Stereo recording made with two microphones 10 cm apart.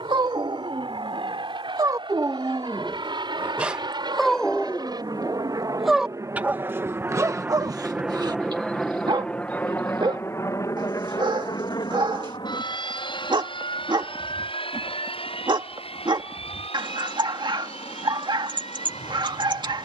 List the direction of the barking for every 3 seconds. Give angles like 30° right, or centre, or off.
40° right, 10° left, 30° right, 50° right, 50° right, 50° right, 50° right.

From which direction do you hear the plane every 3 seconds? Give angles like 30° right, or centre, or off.
70° right, 50° right, 20° right, 30° left, 50° left, 60° left, 70° left.